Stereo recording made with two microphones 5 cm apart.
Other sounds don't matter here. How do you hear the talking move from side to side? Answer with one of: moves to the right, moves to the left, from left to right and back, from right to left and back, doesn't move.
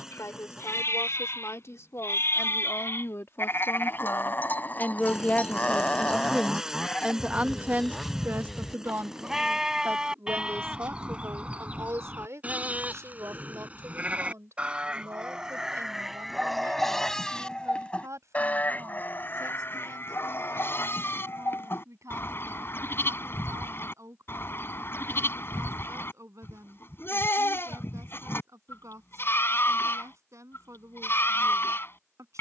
moves to the right.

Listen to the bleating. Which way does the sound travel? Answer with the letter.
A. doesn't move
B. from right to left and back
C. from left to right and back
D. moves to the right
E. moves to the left
C.